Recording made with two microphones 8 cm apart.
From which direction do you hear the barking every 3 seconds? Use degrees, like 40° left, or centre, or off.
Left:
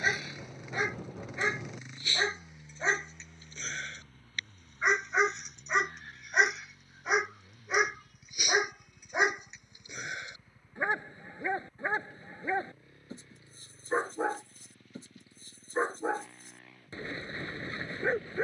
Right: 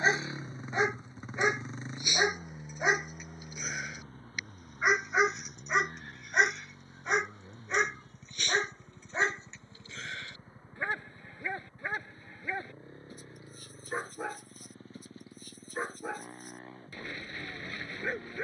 20° right, 10° right, 10° left, 20° left, 30° left, 30° left.